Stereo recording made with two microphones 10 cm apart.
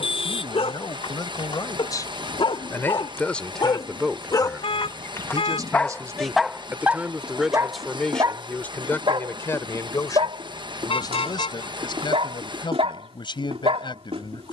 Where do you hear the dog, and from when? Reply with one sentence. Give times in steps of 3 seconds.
You can hear the dog on the left from 0 s and on the right from 6 s.